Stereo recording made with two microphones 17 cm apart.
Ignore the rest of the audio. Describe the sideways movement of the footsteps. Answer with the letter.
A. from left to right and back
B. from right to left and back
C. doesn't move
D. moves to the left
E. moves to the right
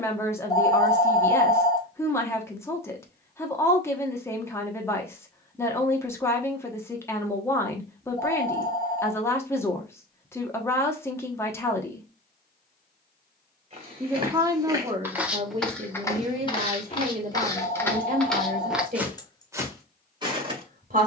B.